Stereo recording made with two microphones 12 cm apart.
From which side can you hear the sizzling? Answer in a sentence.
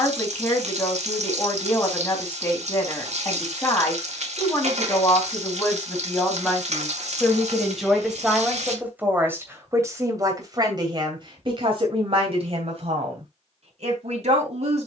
You can hear the sizzling on the right.